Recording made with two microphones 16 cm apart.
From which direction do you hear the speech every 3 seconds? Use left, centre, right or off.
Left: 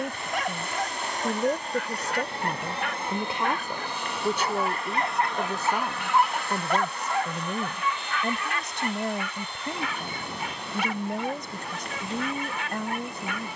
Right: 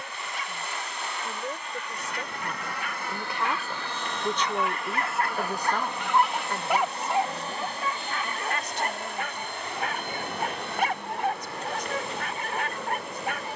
left, centre, left, left, left.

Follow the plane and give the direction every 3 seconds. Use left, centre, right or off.
left, centre, right, right, right.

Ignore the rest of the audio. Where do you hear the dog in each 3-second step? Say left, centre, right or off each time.
left, left, right, right, right.